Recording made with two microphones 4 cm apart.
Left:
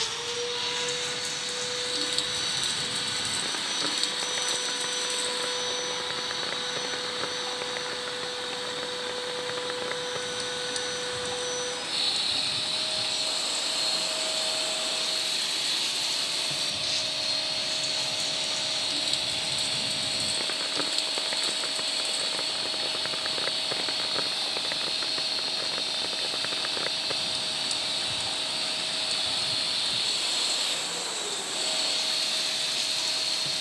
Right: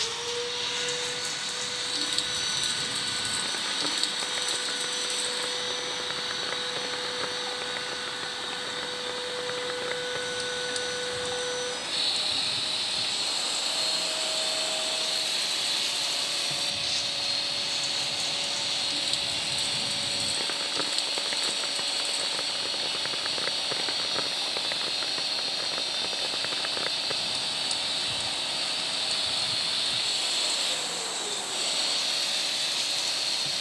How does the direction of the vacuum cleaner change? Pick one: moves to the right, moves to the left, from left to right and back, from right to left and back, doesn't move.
moves to the right.